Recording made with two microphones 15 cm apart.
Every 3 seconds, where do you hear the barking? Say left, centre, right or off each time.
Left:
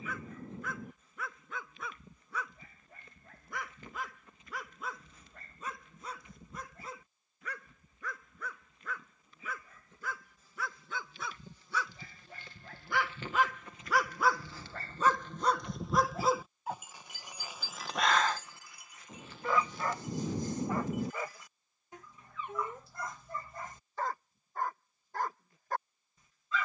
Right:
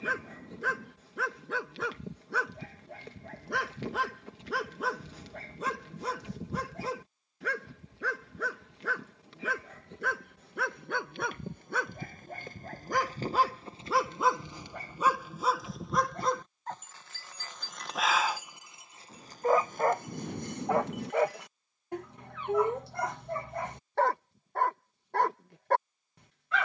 right, right, right, right, right, centre, right, right, right.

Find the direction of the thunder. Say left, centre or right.
centre.